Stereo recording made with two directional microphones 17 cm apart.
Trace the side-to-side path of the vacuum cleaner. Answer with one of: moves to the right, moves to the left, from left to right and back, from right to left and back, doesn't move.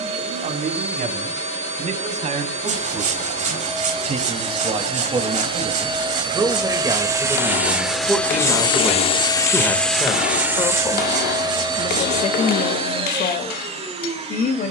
from right to left and back.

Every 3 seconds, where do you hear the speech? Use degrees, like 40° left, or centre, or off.
50° right, 40° right, 10° right, 20° left, 50° left.